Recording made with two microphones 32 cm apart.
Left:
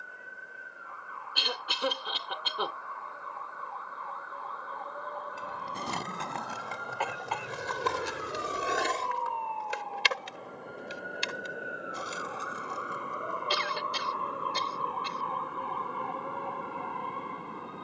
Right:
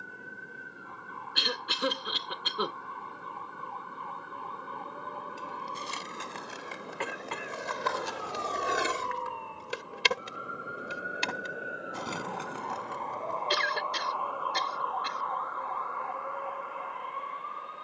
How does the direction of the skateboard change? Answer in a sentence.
You can hear the skateboard travel towards the right.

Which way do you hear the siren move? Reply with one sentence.
In this clip you hear the siren travel towards the left.